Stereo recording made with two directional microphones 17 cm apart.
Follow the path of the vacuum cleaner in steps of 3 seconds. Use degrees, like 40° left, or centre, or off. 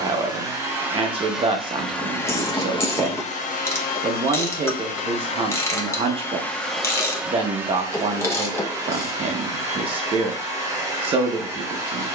centre, 50° left, 10° right, 20° right.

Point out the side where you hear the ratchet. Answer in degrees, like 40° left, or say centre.
20° left.